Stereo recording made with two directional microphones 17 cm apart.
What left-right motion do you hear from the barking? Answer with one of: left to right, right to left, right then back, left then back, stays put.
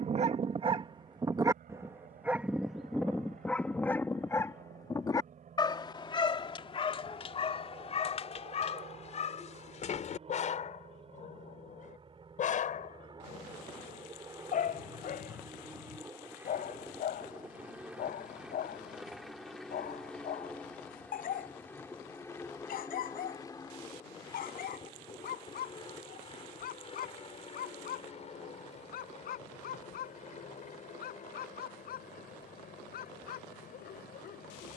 right to left.